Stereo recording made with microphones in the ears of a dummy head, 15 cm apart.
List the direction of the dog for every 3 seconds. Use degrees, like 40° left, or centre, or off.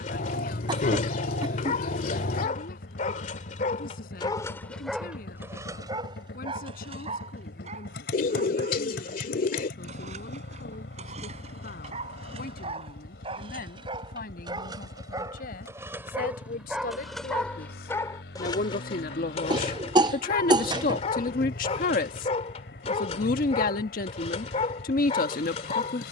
50° left, 10° left, 40° right, 40° right, 30° right, 10° right, 30° left, 40° left, 40° left.